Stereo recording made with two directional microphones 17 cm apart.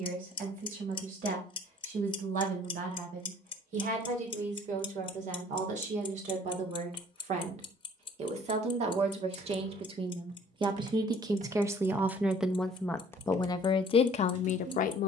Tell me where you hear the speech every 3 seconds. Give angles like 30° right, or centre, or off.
60° right, 50° right, 50° right, 30° right, 30° left.